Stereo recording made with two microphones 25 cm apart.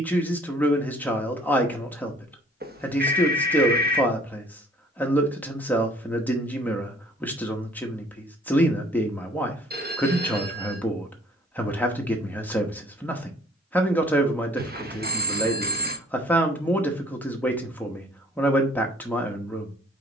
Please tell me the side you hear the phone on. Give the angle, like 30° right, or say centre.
40° right.